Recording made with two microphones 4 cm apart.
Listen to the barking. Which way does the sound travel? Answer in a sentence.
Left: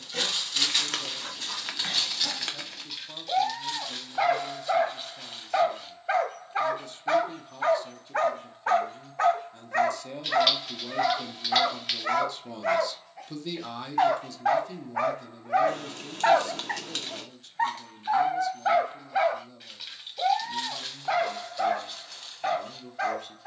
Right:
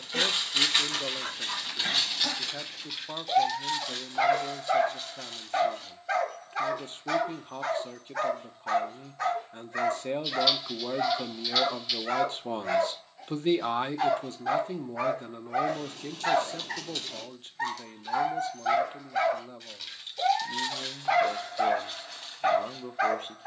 In this clip you hear the barking go left and come back.